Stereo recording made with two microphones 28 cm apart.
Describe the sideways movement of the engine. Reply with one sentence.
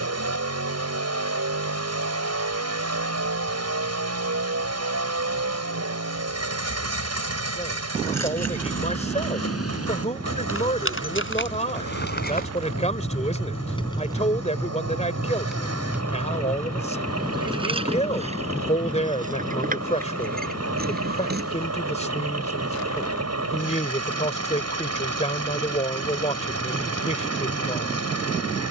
In this clip you hear the engine stay put.